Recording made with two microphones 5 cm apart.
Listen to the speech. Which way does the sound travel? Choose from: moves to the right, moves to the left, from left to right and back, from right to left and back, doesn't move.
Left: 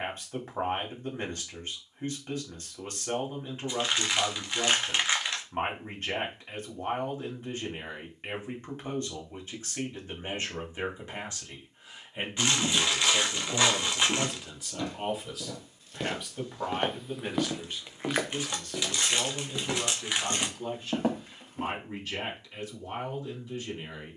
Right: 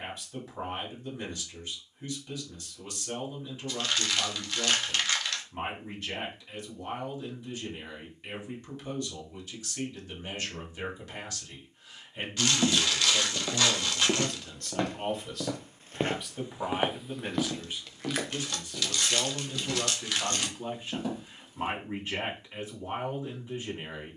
moves to the right.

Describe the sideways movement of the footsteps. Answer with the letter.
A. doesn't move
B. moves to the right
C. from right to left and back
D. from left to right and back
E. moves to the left
E.